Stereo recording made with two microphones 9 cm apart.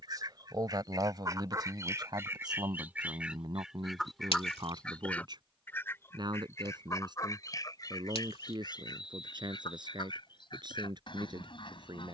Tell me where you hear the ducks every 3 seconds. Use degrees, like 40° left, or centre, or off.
30° right, centre, 40° left, 50° left.